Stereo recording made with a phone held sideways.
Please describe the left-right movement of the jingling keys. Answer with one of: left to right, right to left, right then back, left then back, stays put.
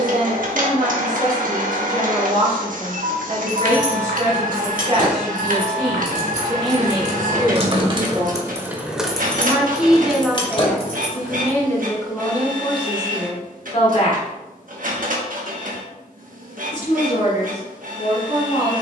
right to left.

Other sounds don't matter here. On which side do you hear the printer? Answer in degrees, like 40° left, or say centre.
70° right.